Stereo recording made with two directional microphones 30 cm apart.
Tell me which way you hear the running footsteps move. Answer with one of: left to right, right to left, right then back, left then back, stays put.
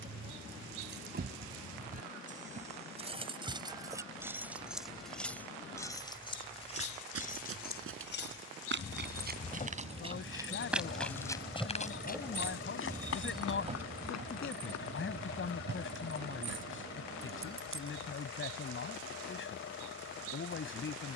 right to left.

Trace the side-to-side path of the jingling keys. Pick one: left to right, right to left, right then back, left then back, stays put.
left then back.